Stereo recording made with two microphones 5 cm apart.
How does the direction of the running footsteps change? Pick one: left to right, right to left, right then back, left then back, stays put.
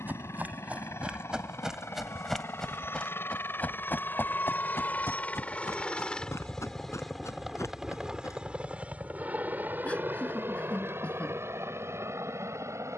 right to left.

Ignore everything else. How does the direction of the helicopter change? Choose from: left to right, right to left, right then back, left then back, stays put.
left to right.